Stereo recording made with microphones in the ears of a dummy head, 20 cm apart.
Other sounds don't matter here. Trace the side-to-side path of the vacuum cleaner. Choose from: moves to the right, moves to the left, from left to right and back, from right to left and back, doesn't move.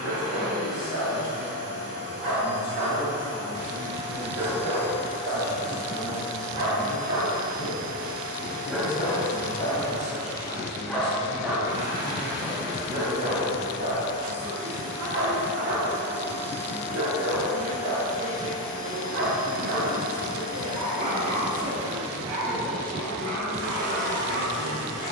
doesn't move.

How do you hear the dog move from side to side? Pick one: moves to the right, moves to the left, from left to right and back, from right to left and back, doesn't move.
from right to left and back.